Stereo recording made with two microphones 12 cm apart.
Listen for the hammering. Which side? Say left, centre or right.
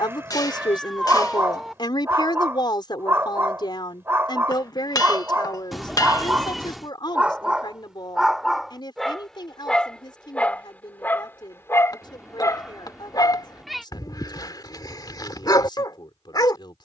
left.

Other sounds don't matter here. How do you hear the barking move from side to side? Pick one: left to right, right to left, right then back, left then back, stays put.
right to left.